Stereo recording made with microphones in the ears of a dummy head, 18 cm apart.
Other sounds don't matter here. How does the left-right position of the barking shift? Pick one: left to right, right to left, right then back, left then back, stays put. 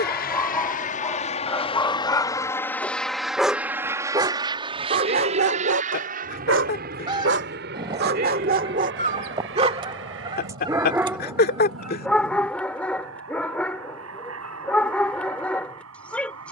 right then back.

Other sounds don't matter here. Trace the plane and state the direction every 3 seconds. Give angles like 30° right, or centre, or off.
30° left, 20° right, 50° right, 60° right, 60° right, 70° right.